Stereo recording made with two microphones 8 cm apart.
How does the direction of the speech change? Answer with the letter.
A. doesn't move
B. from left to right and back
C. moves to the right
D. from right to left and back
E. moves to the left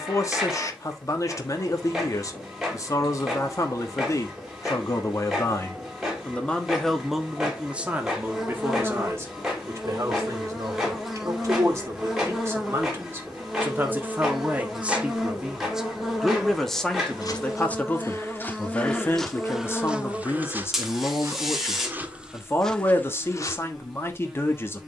B.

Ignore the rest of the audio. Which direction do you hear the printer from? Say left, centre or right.
centre.